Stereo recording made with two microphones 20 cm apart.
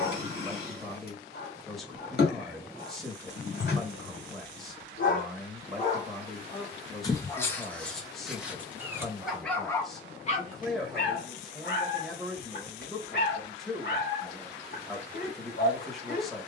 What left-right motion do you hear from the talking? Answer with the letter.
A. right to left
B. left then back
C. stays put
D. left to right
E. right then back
C.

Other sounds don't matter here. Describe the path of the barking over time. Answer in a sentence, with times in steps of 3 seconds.
In this clip you hear the barking on the left from 0 s, in the centre from 6 s and on the left from 9 s.